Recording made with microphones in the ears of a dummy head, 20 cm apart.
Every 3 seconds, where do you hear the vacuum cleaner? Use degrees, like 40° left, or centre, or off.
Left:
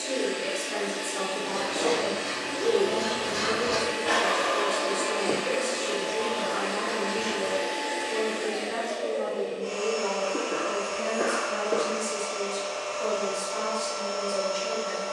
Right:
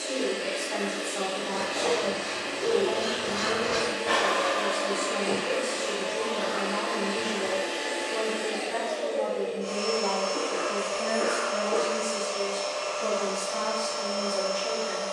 60° left, 50° left, 10° left, 40° right, 60° right.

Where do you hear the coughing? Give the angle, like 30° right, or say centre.
70° left.